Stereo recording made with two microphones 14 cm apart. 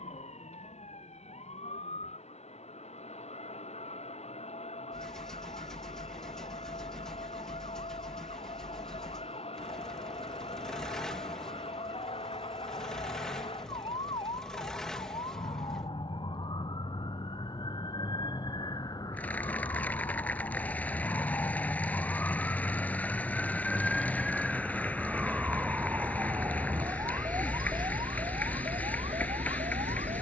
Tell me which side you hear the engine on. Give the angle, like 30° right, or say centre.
centre.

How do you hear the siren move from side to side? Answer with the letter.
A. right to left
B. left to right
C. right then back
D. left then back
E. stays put
B.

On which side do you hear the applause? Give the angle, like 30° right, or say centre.
10° left.